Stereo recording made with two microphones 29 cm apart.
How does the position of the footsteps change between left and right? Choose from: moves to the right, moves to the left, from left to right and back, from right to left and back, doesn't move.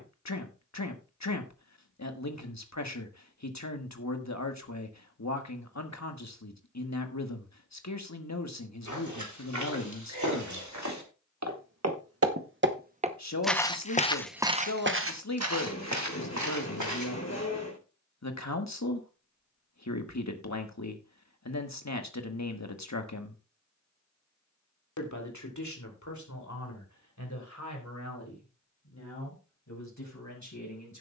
from right to left and back.